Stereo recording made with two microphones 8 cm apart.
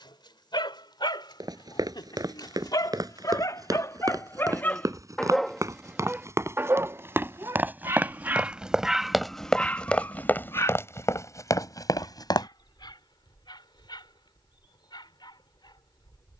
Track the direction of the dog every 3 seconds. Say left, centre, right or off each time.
left, left, right, left, left, left.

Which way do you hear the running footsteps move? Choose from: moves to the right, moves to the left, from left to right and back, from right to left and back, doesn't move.
moves to the left.